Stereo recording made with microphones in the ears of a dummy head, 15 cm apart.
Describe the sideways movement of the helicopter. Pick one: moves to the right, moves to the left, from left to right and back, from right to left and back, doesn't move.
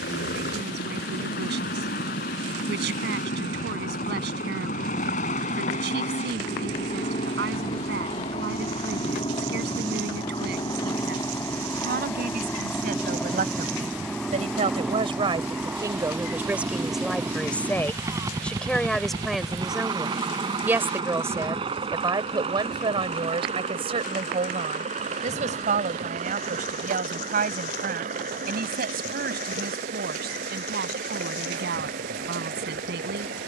moves to the right.